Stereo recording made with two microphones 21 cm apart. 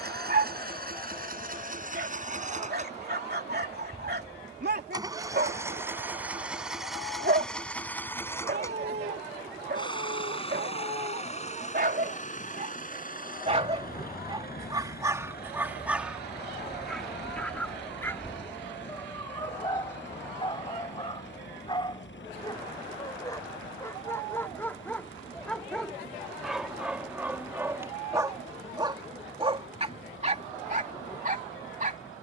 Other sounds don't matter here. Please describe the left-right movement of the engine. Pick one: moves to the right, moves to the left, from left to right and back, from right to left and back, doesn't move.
moves to the left.